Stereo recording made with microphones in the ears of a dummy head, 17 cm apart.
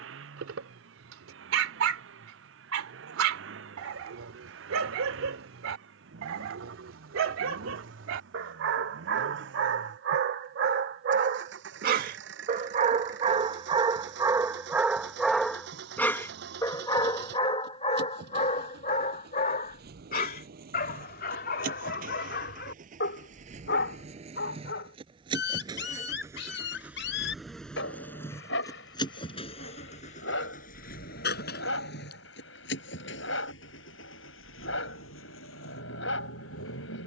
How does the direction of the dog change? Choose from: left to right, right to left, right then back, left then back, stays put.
right to left.